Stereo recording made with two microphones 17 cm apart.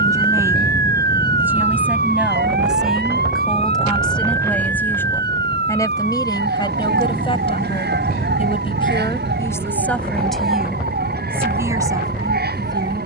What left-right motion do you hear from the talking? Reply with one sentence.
You can hear the talking move from right to left and back again.